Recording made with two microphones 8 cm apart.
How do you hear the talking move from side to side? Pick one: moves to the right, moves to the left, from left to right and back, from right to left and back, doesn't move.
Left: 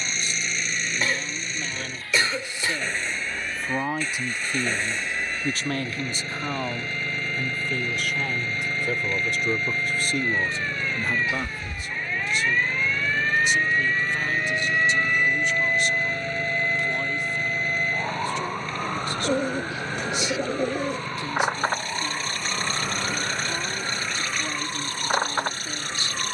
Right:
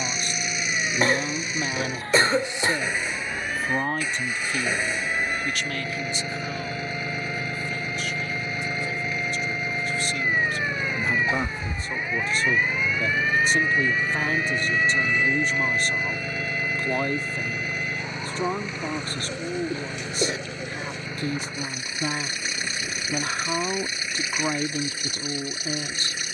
from right to left and back.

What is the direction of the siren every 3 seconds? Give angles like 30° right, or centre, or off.
50° right, 50° right, 40° right, 20° right, centre, 20° left, 50° left, 60° left, 70° left.